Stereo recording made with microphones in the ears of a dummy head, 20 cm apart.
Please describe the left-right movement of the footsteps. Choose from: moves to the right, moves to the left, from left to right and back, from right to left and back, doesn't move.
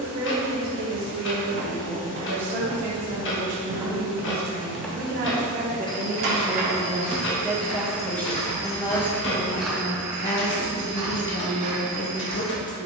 from right to left and back.